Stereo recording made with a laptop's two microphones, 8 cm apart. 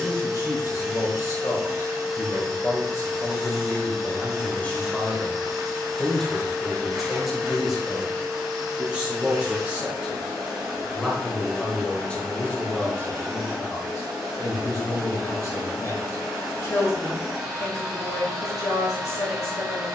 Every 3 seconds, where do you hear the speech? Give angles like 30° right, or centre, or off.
40° left, 20° left, centre, 10° right, 30° left, 40° left, 40° left.